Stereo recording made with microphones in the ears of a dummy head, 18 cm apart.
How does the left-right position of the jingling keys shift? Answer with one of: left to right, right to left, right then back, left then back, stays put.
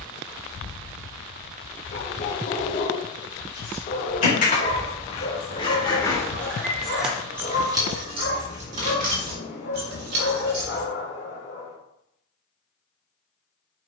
left to right.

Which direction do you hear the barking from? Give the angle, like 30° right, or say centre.
50° left.